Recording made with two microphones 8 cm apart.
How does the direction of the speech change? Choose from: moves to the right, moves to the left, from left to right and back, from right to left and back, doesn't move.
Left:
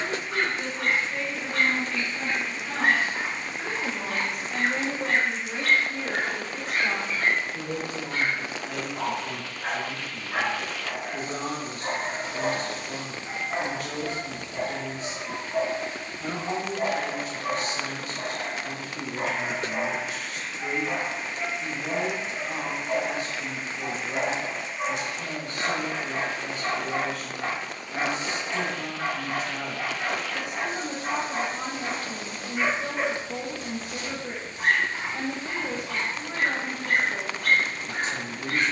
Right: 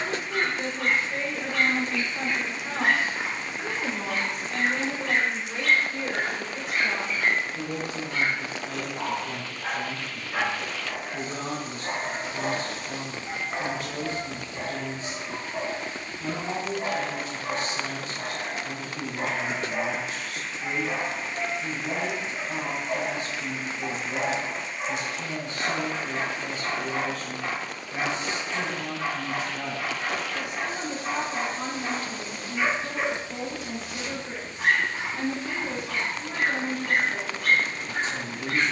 moves to the left.